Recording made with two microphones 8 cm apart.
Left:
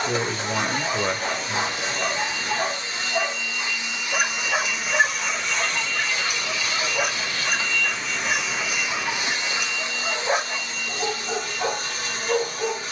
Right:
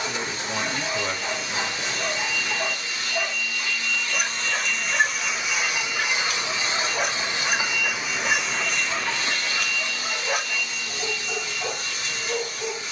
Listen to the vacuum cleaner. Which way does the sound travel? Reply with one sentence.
In this clip you hear the vacuum cleaner move from left to right and back again.